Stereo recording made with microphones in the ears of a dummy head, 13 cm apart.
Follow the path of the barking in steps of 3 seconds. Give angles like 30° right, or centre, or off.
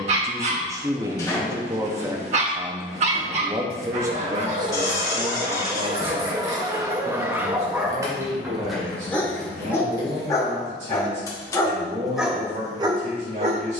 50° right, 50° right, 20° right, 20° left, 30° right.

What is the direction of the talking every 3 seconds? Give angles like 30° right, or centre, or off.
20° right, 30° right, 50° right, 50° right, 50° right.